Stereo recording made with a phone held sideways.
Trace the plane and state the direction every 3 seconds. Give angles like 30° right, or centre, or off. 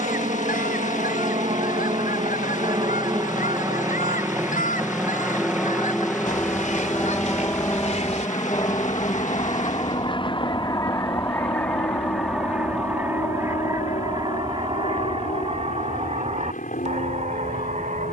40° right, 10° right, 10° left, 30° left, 50° left, 50° left.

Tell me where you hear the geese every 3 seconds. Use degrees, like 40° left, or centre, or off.
70° left, 70° left, 50° left, 30° left, 20° right, 50° right.